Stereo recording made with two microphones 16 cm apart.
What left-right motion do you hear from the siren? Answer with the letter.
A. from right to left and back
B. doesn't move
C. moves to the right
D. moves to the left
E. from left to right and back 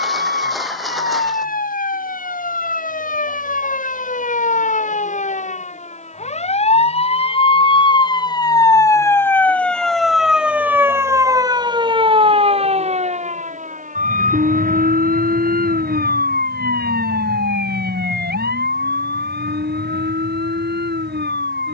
C.